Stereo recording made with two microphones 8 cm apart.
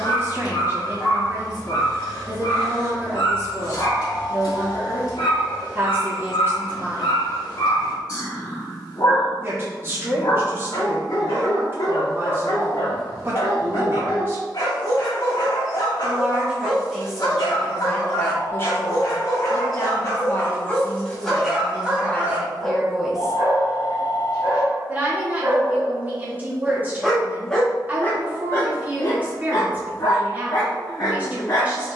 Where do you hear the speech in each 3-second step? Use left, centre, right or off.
right, right, right, right, right, centre, left, centre, right, right, right.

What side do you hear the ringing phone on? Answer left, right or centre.
left.